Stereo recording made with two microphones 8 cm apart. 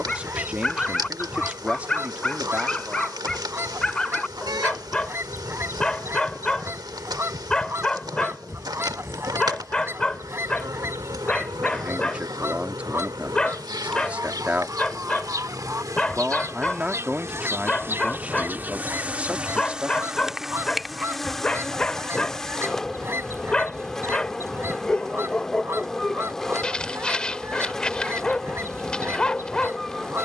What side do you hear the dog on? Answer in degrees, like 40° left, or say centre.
10° left.